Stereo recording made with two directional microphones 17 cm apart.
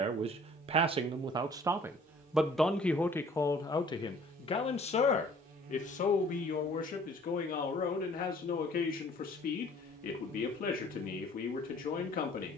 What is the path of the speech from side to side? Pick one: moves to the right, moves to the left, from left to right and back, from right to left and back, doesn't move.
moves to the left.